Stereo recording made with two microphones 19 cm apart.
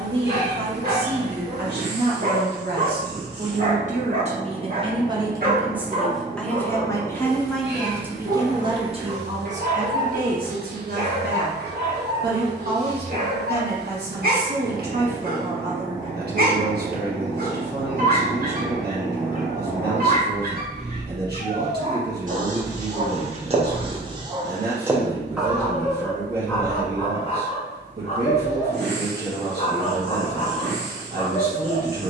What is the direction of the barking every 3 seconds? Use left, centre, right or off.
right, right, right, right, right, right, right, right, centre, left, left.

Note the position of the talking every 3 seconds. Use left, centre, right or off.
right, right, centre, right, right, right, right, right, right, right, right.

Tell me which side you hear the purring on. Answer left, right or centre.
right.